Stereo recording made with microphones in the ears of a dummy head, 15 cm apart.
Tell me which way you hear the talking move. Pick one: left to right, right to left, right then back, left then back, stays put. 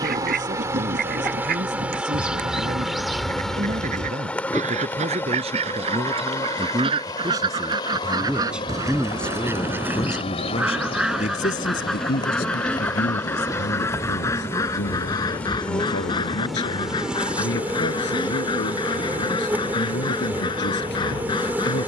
right to left.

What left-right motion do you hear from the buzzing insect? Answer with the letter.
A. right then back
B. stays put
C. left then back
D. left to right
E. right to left
C.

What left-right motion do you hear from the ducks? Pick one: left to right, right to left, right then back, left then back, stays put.
right to left.